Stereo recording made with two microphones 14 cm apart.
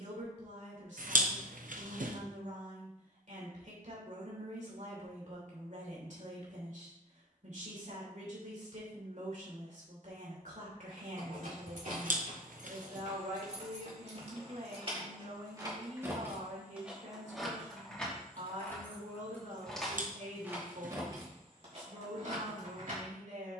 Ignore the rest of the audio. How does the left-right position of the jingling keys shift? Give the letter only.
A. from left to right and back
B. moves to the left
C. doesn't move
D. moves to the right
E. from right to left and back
E.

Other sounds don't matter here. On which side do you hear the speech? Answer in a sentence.
You can hear the speech on the right.